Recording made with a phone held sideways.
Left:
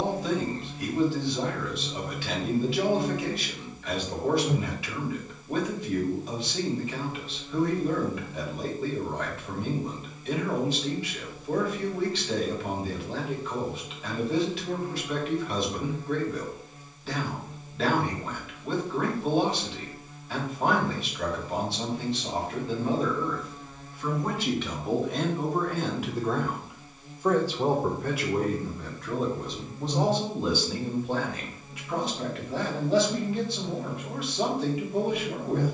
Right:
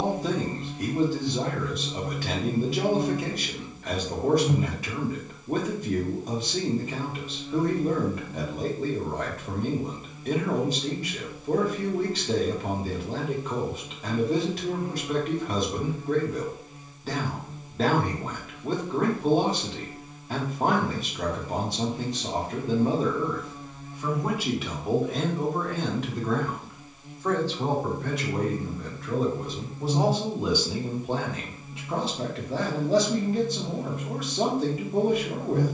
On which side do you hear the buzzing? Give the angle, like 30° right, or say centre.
20° right.